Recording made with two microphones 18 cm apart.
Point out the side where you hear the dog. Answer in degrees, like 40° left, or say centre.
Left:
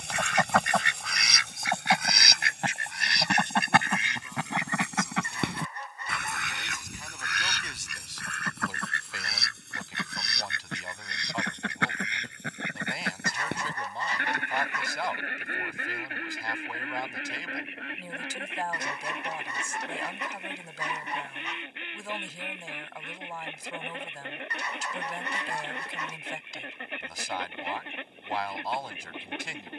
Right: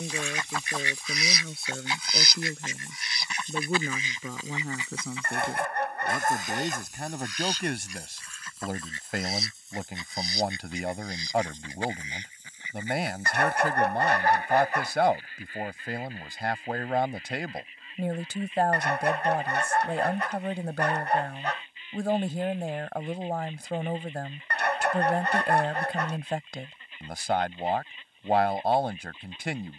80° right.